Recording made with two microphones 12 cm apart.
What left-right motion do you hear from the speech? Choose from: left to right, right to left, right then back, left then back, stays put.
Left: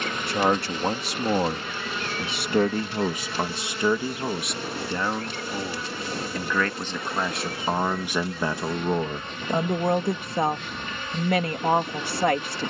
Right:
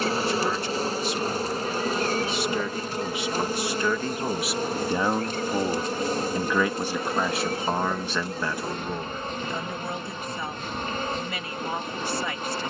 right then back.